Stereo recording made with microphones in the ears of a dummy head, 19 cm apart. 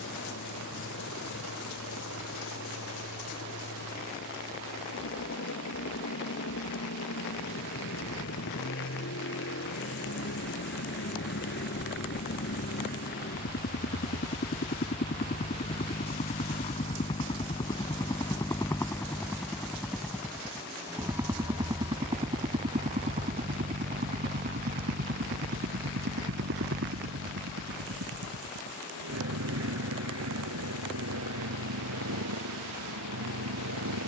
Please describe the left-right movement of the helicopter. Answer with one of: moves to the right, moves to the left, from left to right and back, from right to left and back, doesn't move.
moves to the right.